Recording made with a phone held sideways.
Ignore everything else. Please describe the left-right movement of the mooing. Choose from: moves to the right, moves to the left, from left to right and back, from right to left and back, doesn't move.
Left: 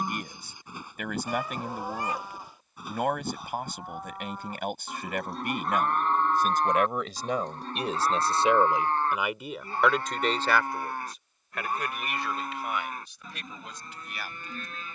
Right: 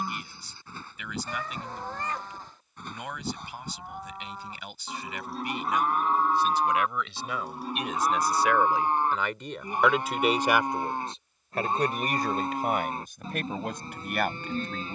moves to the right.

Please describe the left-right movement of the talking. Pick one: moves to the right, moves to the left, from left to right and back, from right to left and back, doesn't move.
moves to the right.